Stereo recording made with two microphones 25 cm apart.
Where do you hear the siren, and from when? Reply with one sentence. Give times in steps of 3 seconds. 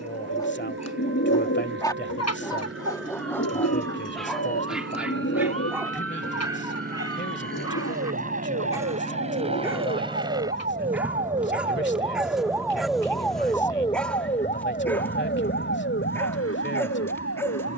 In this clip you hear the siren on the right from 0 s, in the centre from 12 s and on the left from 15 s.